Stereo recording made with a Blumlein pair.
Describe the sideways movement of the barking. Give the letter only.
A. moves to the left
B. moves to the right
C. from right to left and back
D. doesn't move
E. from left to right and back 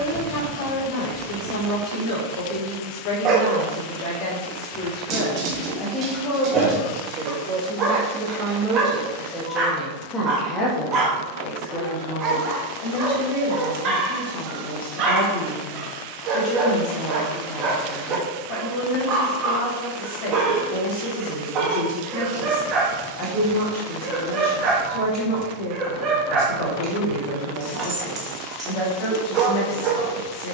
D.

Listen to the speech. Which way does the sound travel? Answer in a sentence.
You can hear the speech move from left to right and back again.